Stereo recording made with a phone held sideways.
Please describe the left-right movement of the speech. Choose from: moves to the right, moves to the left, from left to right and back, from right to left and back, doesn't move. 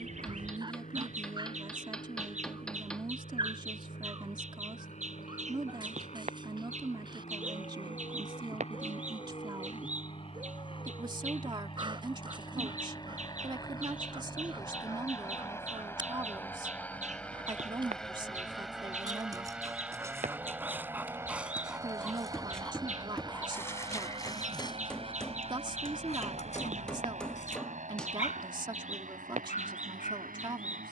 doesn't move.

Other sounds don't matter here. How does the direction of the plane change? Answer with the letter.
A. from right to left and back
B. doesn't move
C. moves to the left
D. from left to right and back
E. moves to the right
E.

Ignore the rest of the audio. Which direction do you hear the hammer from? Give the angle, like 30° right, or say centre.
10° left.